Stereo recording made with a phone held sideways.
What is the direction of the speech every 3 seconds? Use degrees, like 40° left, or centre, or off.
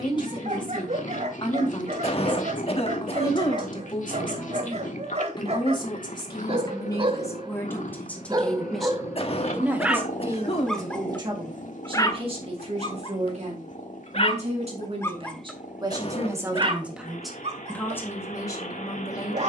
30° left, 30° left, 20° left, 20° right, 50° right, 20° right, 20° left.